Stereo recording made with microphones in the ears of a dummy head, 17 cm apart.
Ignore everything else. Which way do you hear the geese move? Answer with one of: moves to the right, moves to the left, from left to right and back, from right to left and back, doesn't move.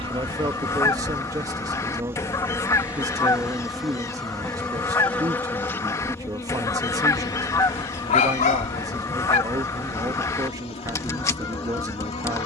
doesn't move.